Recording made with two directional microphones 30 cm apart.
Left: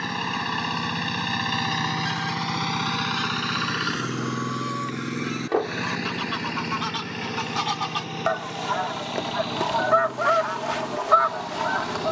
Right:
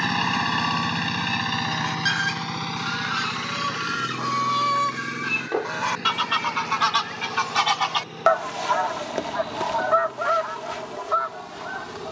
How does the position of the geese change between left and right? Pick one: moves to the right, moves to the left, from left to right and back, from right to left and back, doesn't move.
moves to the left.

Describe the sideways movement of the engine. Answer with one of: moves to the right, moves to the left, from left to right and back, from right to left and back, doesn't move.
moves to the left.